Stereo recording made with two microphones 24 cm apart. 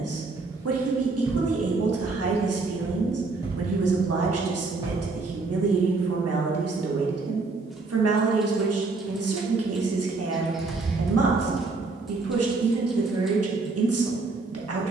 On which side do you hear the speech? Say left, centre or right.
right.